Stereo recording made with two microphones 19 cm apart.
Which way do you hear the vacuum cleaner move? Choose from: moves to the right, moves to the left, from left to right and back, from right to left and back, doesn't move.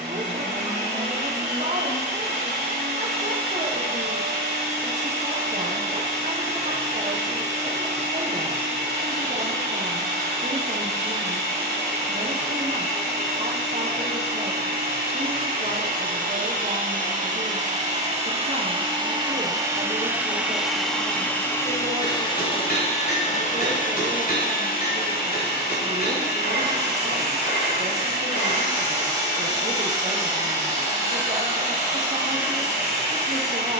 moves to the left.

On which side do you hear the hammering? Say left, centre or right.
left.